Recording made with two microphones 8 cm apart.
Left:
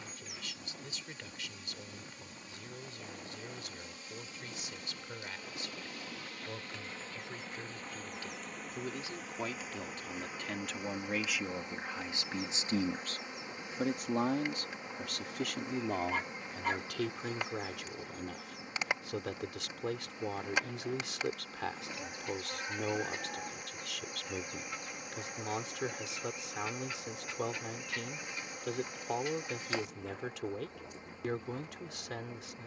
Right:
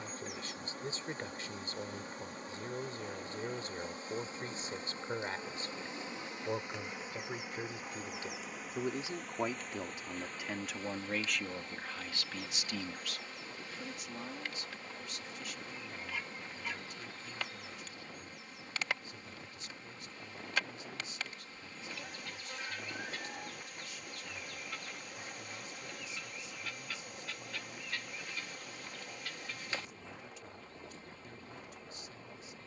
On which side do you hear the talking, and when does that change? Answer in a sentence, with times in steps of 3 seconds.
You can hear the talking on the right from 0 s, in the centre from 9 s and on the left from 12 s.